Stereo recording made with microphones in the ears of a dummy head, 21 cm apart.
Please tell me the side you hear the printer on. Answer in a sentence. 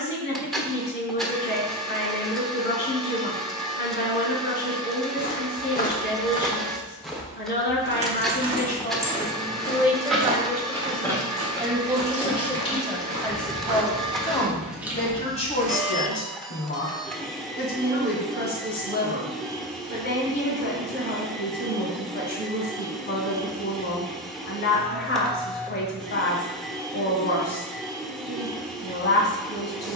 You can hear the printer in the centre.